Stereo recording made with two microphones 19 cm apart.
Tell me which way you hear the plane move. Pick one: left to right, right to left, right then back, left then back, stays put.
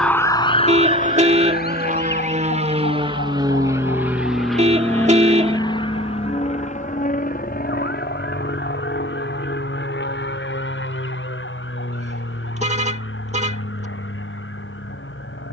right to left.